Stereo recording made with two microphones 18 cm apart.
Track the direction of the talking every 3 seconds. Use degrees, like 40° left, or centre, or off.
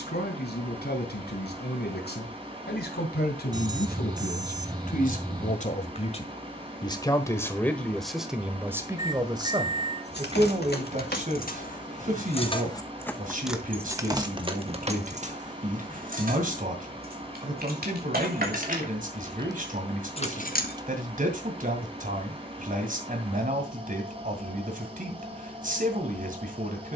70° left, 50° left, 10° left, 40° right, 50° right, 50° right, 50° right, 50° right, 50° right.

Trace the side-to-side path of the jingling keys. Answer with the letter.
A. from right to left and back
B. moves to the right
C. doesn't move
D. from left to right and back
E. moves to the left
D.